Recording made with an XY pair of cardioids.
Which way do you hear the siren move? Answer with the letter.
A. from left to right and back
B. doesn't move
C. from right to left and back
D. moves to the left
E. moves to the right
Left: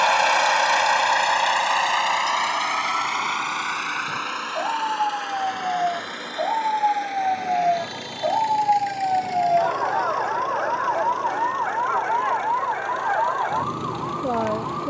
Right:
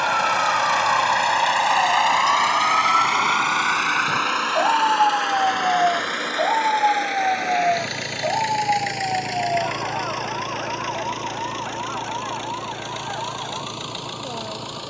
D.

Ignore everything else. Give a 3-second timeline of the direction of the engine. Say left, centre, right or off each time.
centre, right, right, right, right.